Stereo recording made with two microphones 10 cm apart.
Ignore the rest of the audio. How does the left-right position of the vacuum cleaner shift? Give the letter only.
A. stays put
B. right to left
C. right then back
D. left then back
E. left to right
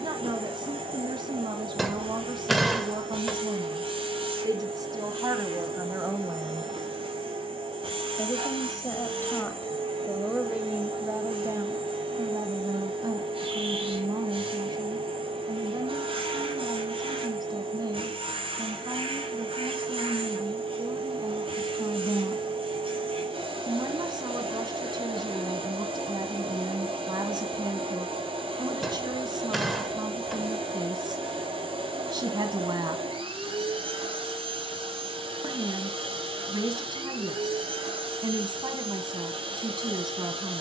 A.